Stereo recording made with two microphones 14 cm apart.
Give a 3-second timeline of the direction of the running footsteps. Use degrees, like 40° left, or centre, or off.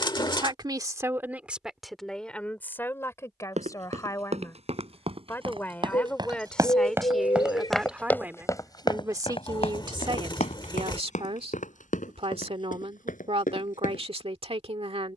off, 50° right, centre, 60° left, 80° left.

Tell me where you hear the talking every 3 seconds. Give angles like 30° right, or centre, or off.
10° right, 20° left, centre, 40° right, 50° right.